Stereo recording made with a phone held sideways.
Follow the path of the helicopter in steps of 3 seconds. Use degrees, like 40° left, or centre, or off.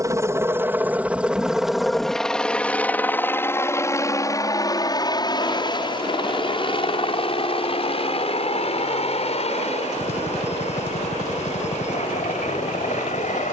centre, 20° left, 40° left, 50° left, 50° left.